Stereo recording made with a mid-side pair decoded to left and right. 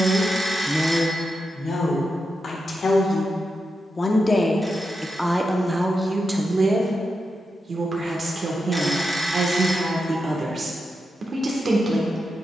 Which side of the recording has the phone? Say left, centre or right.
centre.